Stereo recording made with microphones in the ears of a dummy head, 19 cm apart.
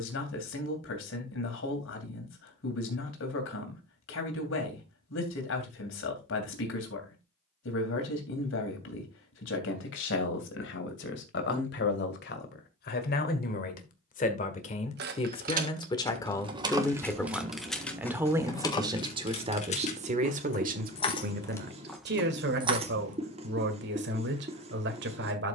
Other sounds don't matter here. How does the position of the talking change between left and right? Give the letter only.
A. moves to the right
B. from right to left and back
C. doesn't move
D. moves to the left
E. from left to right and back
A.